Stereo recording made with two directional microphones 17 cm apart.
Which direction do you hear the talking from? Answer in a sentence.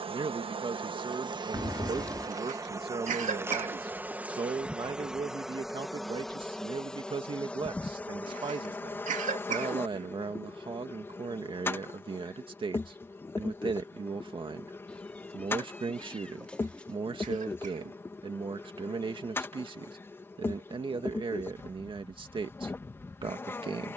You can hear the talking on the right.